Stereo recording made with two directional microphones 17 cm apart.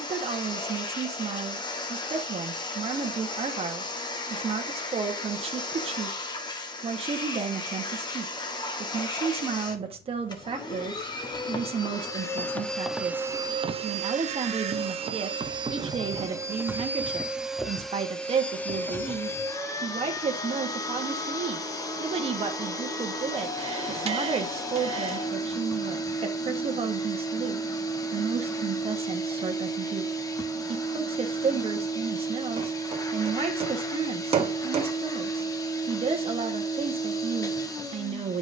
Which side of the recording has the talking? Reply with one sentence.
You can hear the talking on the right.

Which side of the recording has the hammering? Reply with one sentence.
You can hear the hammering on the right.